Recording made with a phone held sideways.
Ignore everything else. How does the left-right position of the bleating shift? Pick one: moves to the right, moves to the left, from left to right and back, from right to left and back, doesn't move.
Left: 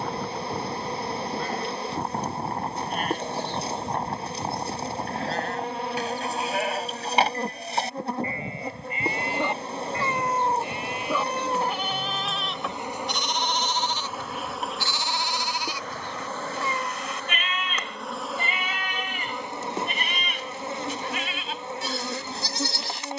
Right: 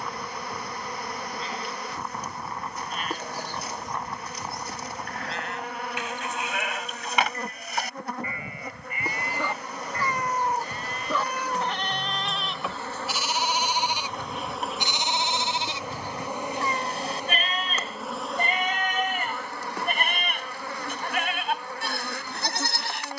moves to the right.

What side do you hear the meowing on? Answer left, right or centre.
left.